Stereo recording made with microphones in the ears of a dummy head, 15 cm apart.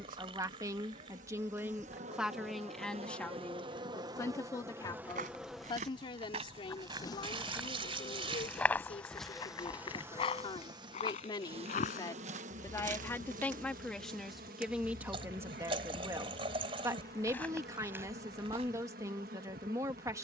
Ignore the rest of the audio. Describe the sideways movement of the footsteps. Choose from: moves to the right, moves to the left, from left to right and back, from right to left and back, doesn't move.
from right to left and back.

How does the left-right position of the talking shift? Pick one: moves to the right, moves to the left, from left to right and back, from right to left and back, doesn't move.
from right to left and back.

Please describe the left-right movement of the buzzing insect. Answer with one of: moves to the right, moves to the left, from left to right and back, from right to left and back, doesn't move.
from right to left and back.